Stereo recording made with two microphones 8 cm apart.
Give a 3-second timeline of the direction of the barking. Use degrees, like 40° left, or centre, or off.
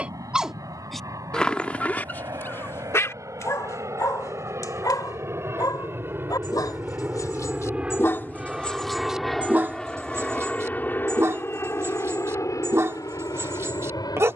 20° left, 50° left, 40° left, 30° right, 40° right.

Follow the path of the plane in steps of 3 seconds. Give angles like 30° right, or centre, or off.
60° right, 40° right, 20° right, 20° left, 50° left.